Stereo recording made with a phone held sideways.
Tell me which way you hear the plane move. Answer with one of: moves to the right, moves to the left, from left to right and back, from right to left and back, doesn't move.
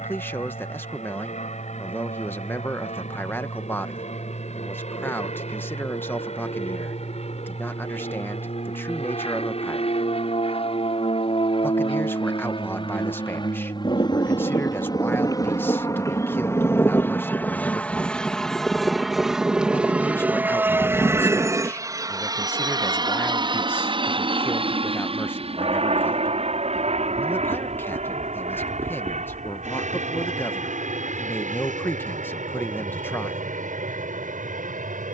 moves to the right.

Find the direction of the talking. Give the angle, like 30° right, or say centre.
20° left.